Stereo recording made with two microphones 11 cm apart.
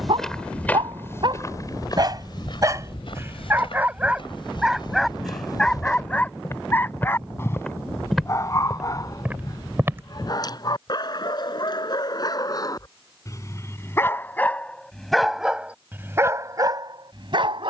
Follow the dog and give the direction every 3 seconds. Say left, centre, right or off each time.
right, centre, left, left, left, right.